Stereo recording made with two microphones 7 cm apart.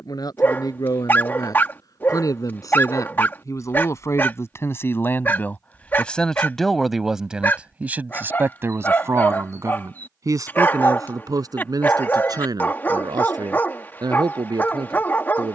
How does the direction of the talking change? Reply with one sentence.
In this clip you hear the talking move from left to right.